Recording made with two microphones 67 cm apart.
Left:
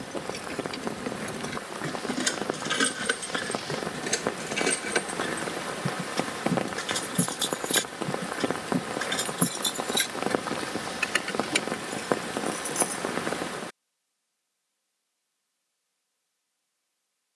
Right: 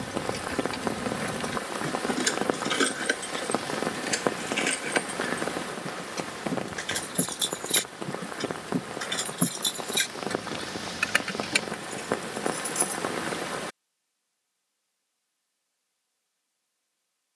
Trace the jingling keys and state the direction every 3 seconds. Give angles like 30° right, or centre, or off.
10° right, 60° left, 30° left, 10° right, 30° right, off.